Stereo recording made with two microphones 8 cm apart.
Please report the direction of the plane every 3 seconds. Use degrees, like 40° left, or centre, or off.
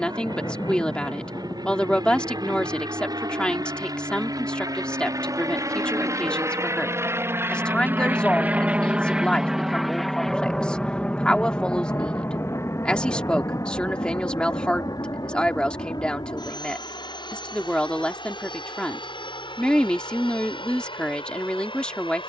60° right, 50° right, 30° right, 10° left, 40° left, 50° left, 60° left, 70° left.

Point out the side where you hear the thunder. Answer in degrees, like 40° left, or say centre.
40° left.